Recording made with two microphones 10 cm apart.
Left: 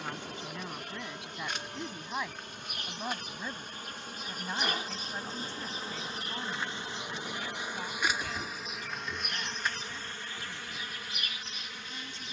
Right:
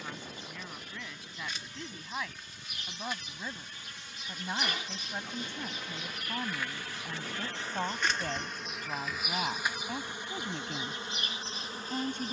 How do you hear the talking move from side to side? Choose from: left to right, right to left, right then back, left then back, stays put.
left to right.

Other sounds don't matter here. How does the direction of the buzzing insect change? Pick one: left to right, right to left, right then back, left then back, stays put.
left to right.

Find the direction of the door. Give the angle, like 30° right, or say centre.
20° left.